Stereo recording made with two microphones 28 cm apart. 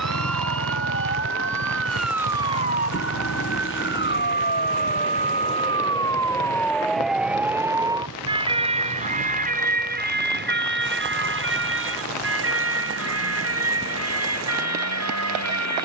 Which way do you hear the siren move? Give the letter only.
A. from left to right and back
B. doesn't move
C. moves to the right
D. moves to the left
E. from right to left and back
C.